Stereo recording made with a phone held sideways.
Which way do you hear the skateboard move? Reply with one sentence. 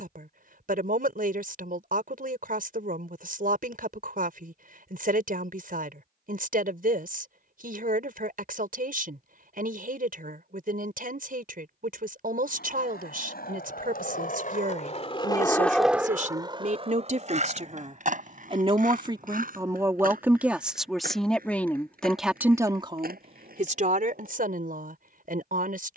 In this clip you hear the skateboard move to the right.